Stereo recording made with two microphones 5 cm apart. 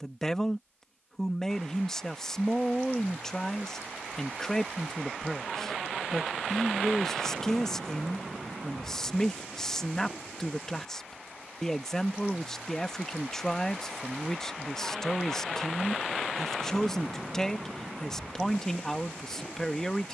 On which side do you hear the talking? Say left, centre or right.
centre.